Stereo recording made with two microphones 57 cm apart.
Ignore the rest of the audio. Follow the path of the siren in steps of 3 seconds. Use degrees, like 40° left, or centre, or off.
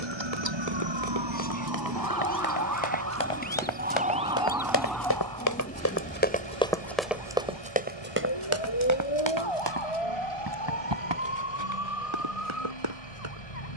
40° right, centre, 30° left, 60° left, 70° left.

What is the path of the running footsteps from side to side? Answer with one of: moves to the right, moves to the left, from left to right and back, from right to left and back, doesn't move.
moves to the right.